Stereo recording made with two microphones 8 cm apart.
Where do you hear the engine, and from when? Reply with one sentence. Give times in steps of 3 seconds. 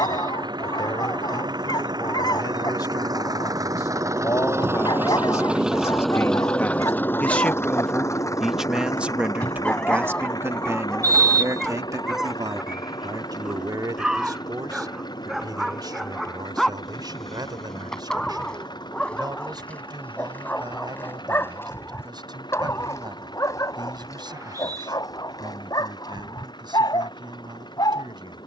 You can hear the engine on the right from 0 s and on the left from 6 s.